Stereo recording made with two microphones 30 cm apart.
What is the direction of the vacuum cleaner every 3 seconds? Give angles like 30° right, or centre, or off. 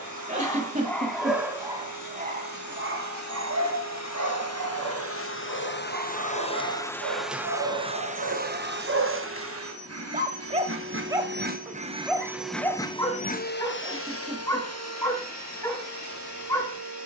70° left, 50° left, 10° right, 40° right, 30° left, 70° left.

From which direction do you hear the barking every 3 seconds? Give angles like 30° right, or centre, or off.
10° right, 70° right, 60° right, 20° right, 10° left, 10° left.